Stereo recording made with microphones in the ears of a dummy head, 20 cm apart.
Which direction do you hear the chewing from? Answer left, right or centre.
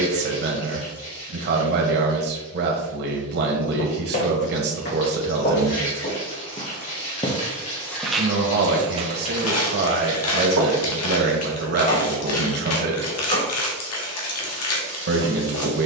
left.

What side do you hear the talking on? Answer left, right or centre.
right.